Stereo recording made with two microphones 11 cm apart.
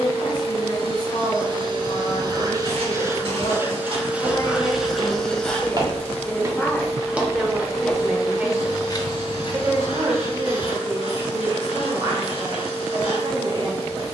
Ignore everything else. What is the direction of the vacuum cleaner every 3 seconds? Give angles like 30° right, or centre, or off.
40° right, 10° right, 30° left, 50° left, 50° left.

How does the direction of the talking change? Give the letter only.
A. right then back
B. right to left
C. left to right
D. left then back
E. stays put
C.